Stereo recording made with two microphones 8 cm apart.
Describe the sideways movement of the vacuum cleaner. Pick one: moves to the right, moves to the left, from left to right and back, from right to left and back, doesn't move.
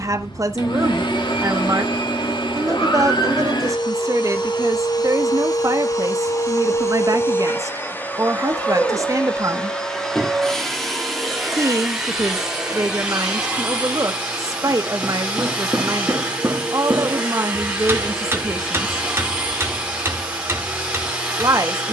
moves to the right.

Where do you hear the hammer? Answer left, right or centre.
right.